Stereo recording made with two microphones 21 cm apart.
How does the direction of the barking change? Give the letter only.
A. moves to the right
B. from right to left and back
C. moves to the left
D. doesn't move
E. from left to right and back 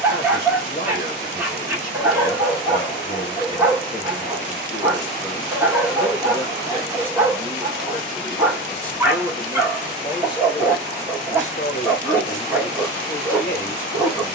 D.